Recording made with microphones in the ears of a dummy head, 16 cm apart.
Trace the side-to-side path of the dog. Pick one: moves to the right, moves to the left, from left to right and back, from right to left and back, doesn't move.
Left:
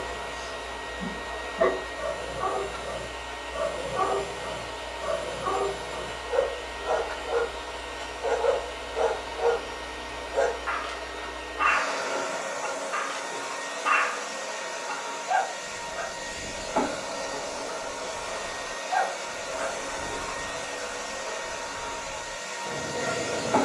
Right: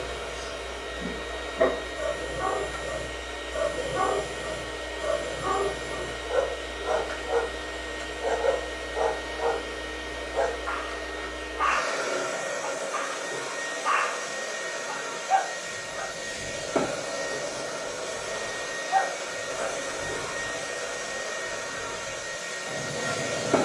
moves to the left.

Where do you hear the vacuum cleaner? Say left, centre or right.
right.